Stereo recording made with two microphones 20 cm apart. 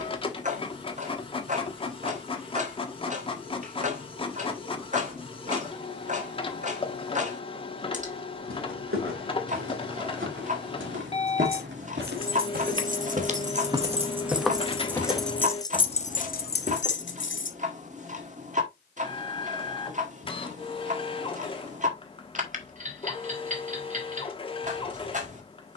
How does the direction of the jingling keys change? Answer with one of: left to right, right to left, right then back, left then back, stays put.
right to left.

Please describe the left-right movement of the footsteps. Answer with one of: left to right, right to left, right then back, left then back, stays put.
right to left.